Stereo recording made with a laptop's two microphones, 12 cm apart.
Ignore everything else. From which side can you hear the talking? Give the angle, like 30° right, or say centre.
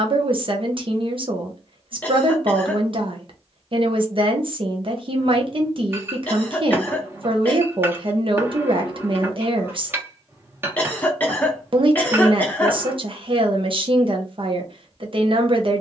50° right.